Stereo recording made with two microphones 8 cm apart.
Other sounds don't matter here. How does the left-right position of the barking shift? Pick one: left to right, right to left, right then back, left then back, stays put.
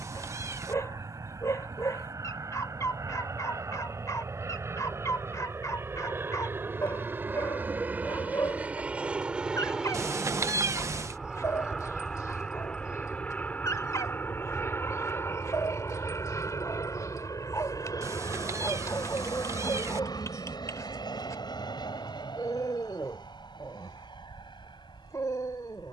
stays put.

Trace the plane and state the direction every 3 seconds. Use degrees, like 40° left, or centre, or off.
50° right, 40° right, 20° right, centre, 20° left, 40° left, 50° left, 60° left, 70° left.